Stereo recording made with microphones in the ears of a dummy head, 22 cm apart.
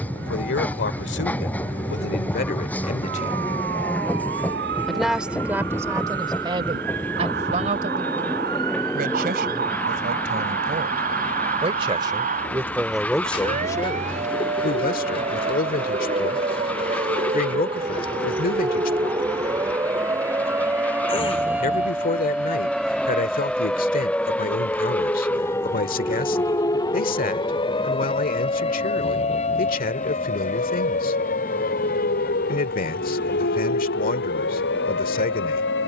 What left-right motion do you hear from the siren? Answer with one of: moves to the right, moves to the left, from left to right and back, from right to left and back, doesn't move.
moves to the left.